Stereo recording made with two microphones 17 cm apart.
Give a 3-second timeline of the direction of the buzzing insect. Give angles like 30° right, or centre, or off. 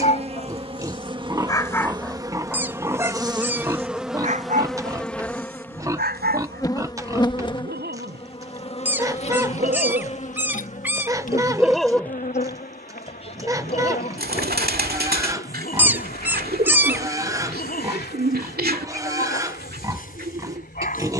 30° right, centre, 30° left, 50° left, 60° left, 60° left, 70° left.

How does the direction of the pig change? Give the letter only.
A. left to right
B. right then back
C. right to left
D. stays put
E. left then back
D.